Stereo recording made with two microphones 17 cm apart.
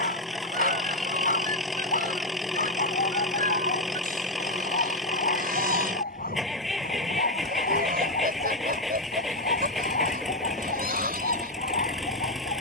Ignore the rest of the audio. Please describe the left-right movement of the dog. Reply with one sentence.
In this clip you hear the dog stay put.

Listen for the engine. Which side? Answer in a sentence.
You can hear the engine in the centre.